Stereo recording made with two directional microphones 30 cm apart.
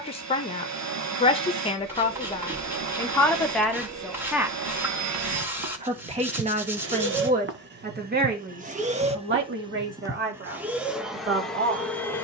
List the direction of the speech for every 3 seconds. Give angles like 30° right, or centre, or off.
20° left, centre, 30° right, 40° right.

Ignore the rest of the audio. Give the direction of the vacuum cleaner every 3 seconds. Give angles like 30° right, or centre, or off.
70° right, 60° right, 40° right, 10° right.